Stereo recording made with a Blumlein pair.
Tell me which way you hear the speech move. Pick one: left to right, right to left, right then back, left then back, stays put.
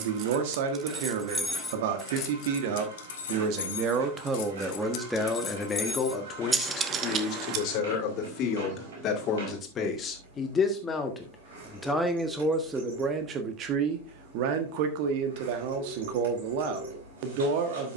left then back.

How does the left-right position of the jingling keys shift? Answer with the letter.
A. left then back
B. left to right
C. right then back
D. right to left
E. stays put
A.